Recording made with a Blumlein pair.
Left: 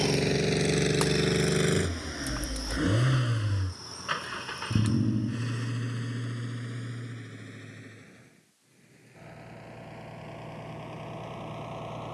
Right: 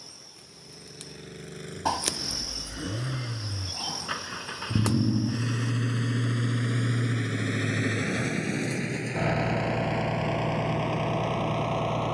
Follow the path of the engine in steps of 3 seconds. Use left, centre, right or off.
left, centre, right, right.